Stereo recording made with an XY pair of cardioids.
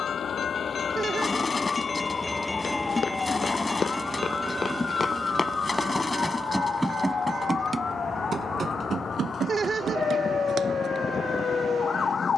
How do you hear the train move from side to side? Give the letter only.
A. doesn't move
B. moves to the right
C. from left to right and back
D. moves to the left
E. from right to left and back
B.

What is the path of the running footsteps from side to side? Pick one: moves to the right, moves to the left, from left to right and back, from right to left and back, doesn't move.
moves to the right.